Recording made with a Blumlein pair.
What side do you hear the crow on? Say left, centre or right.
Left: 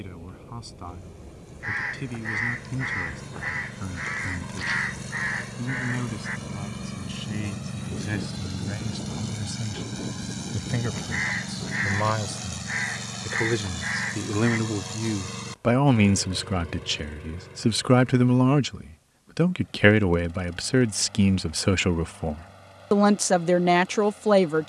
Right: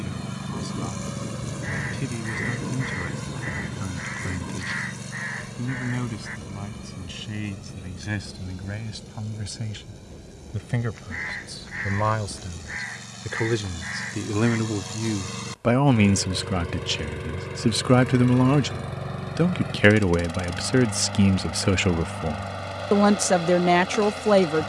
left.